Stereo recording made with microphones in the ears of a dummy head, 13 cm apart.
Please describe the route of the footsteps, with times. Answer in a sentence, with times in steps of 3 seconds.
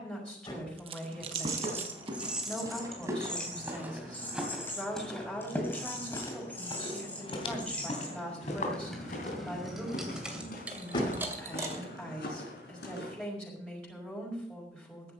You can hear the footsteps on the right from 0 s, in the centre from 3 s and on the left from 6 s.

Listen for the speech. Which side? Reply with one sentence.
You can hear the speech in the centre.